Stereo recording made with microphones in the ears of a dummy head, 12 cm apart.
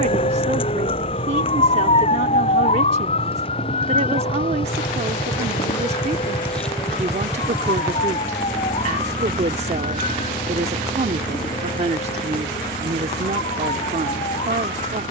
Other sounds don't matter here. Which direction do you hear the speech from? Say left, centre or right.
right.